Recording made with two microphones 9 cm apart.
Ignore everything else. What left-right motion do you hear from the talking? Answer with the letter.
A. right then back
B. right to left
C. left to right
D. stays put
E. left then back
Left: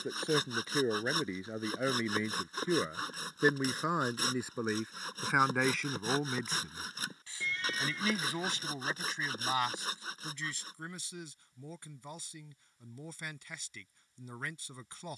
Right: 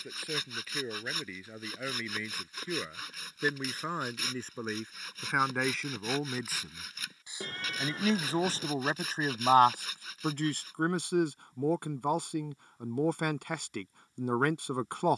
C.